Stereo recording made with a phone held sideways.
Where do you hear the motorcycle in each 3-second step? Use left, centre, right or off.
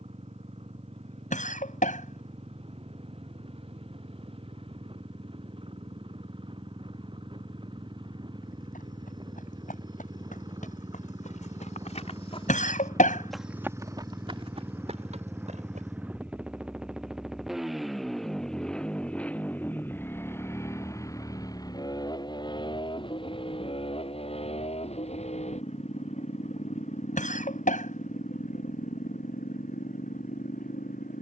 right, right, right, right, right, centre, centre, left, left, left, left.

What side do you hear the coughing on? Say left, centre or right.
left.